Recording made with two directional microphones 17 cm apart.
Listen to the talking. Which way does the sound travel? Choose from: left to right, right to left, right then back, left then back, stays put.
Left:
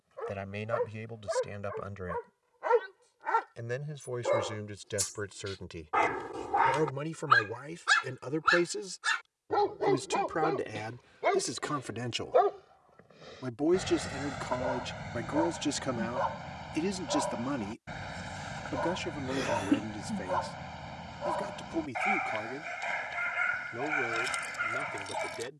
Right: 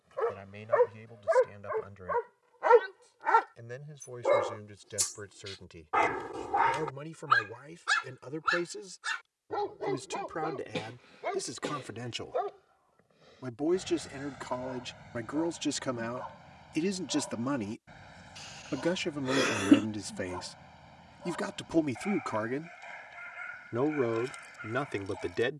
left to right.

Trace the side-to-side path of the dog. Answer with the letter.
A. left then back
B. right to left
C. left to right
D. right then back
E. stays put
B.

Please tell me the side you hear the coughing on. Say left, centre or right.
right.